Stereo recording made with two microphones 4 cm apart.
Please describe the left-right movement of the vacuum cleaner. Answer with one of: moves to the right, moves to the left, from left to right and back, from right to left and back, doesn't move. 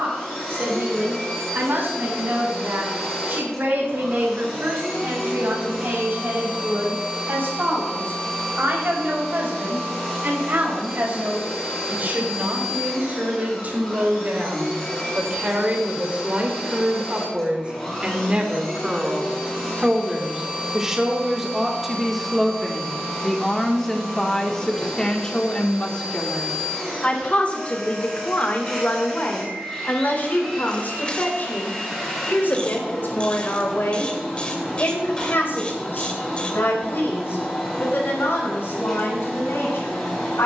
doesn't move.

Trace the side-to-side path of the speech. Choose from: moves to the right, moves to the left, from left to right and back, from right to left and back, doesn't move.
moves to the left.